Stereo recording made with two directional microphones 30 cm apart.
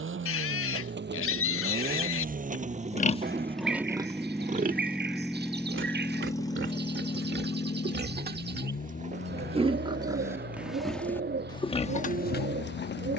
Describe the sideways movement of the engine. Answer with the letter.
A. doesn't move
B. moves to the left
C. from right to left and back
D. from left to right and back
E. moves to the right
B.